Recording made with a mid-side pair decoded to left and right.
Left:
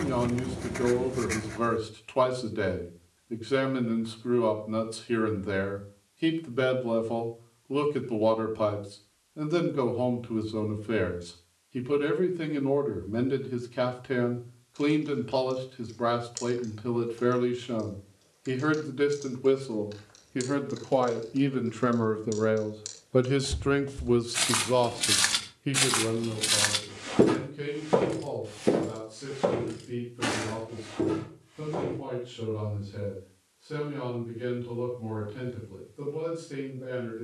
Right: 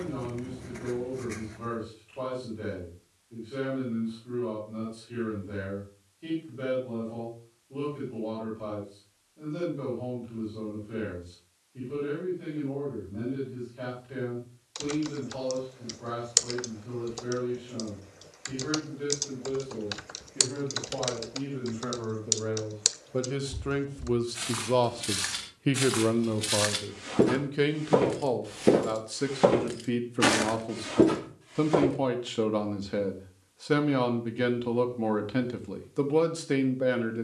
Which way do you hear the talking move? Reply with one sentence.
You can hear the talking go from the left side to the right.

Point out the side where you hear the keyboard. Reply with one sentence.
You can hear the keyboard on the right.